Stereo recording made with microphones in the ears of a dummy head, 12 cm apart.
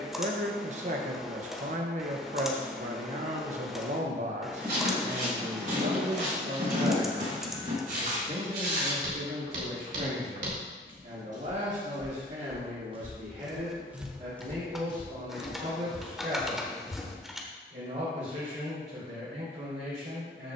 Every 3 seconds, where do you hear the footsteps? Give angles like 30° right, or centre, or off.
off, 70° right, 70° right, 60° right, 20° right, 60° left, off.